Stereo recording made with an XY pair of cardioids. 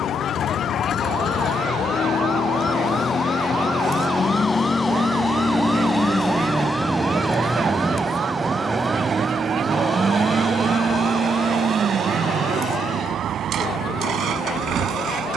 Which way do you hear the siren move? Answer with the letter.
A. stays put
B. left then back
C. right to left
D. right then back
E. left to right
E.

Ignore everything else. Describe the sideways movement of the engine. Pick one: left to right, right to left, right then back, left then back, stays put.
left to right.